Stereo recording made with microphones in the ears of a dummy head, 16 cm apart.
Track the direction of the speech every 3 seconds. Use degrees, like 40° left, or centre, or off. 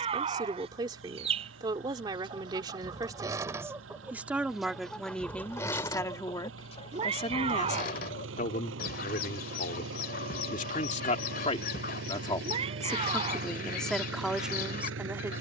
20° right, centre, 40° left, 40° left, 10° left.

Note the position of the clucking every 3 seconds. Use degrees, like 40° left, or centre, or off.
30° right, centre, 40° left, 60° left, 60° left.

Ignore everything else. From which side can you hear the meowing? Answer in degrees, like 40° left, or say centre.
30° right.